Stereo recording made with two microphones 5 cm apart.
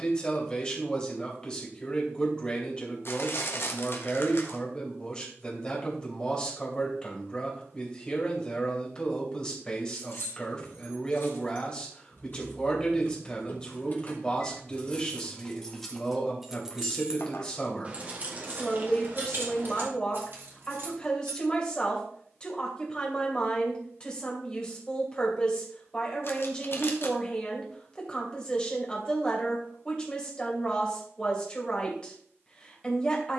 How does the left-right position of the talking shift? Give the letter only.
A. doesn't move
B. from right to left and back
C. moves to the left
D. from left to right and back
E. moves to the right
A.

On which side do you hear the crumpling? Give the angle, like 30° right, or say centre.
50° left.